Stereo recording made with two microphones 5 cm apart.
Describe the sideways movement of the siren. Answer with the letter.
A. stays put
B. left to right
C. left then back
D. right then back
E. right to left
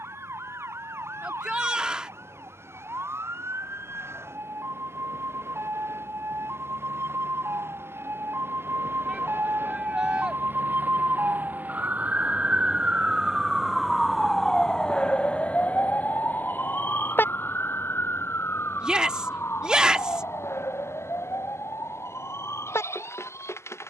E.